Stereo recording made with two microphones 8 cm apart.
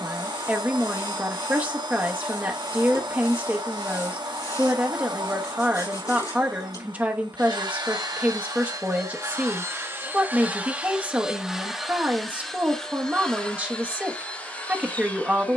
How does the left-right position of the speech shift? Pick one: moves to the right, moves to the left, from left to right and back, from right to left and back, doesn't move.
doesn't move.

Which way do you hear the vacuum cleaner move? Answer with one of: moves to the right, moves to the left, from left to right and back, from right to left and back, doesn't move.
moves to the left.